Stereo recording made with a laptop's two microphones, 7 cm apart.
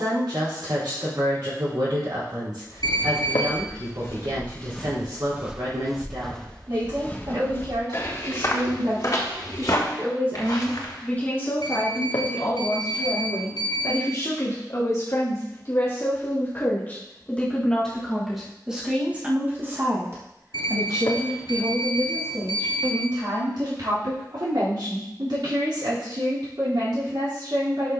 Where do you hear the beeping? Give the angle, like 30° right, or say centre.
70° left.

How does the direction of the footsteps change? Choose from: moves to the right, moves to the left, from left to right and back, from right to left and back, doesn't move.
from left to right and back.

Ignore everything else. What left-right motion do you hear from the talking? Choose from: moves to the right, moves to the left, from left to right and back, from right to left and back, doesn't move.
from right to left and back.